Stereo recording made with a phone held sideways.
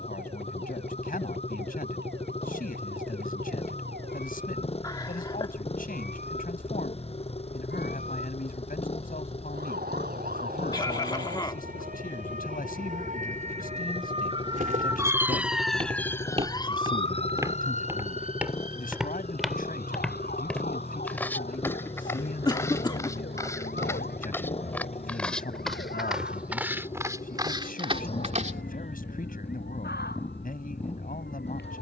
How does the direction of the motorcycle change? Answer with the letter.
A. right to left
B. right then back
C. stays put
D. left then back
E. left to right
C.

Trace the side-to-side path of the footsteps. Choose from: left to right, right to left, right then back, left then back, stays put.
left then back.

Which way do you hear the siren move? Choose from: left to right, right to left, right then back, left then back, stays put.
right to left.